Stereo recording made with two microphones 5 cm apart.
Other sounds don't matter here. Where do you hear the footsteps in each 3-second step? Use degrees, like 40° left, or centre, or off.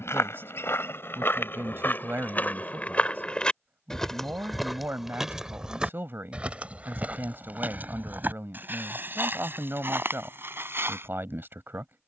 40° left, centre, 40° right, 50° right.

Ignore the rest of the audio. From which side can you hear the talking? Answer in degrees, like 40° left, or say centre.
50° right.